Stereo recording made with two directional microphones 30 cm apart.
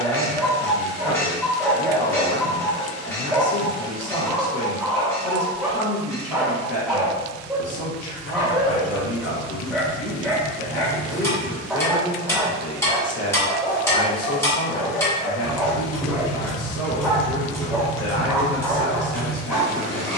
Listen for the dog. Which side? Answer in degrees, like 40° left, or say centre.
centre.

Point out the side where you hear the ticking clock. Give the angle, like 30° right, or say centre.
10° left.